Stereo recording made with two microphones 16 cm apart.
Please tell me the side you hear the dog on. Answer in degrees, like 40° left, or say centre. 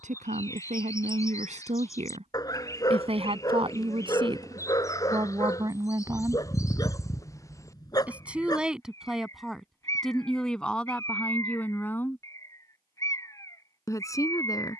20° left.